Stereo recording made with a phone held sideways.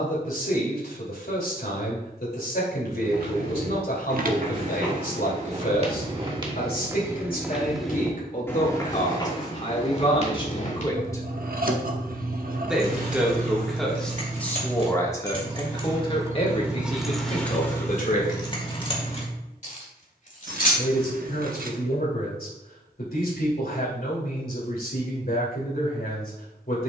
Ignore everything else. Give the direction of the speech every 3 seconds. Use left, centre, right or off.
left, left, left, left, centre, left, left, left, left.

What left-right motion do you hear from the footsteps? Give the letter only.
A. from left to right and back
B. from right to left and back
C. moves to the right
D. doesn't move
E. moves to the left
E.